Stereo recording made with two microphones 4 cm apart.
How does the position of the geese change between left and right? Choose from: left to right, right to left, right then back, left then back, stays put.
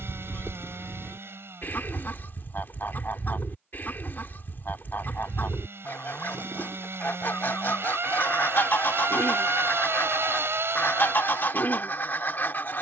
stays put.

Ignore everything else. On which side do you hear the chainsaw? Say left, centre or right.
right.